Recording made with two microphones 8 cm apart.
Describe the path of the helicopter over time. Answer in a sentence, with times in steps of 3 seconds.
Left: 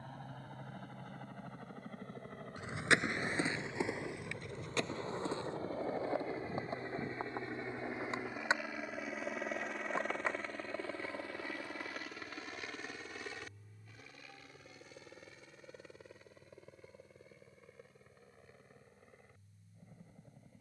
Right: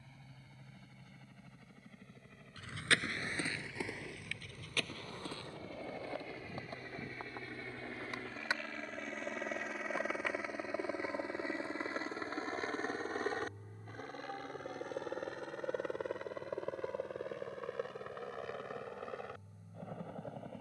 In this clip you hear the helicopter on the left from 0 s, in the centre from 9 s and on the right from 12 s.